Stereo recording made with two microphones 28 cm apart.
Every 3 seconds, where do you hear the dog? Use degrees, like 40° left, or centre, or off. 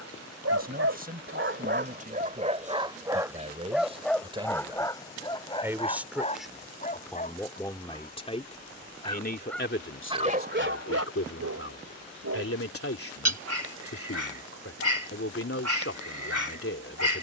40° right, 10° left, 30° left, 30° right, 60° right, 60° right.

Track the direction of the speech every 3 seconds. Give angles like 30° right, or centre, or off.
30° right, 20° right, 10° left, 50° left, 50° left, 50° left.